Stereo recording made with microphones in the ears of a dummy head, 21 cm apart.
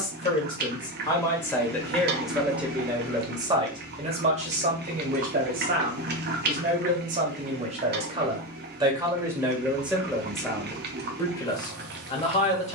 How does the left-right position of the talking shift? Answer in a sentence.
You can hear the talking move from left to right and back again.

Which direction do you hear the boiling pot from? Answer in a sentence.
You can hear the boiling pot on the right.